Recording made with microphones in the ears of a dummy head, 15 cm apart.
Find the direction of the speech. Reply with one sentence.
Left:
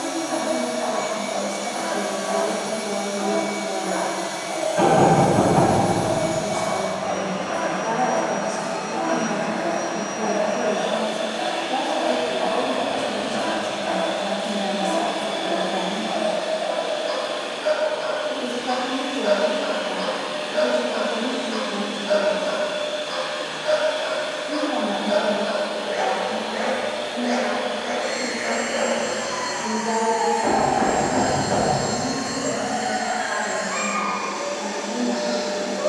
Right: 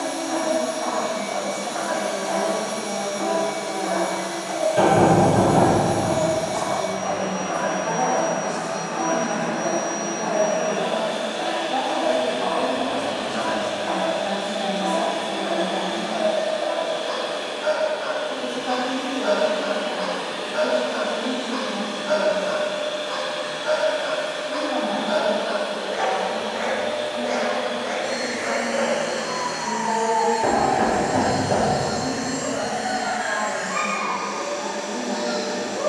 You can hear the speech on the left.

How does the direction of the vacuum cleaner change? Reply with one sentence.
In this clip you hear the vacuum cleaner stay in one place.